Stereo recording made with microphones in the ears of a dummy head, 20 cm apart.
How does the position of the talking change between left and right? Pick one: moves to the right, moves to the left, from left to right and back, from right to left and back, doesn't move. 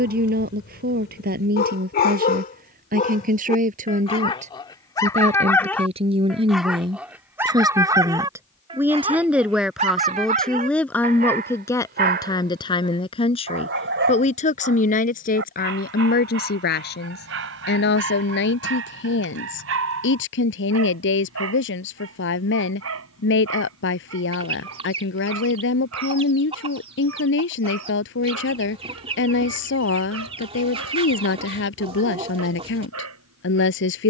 moves to the left.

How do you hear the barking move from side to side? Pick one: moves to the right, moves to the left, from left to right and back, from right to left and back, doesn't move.
moves to the right.